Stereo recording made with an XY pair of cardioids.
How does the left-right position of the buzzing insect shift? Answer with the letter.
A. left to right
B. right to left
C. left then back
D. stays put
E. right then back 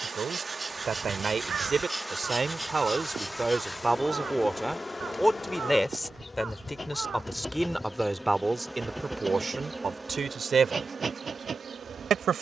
C.